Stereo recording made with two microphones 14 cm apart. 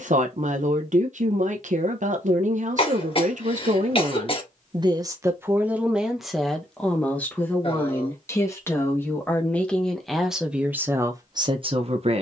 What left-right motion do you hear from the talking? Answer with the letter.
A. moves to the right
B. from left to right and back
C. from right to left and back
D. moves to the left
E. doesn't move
C.